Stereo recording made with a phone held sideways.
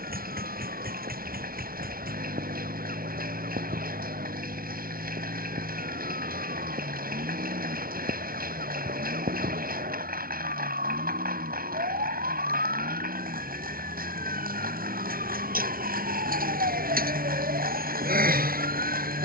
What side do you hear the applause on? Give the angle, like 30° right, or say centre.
80° right.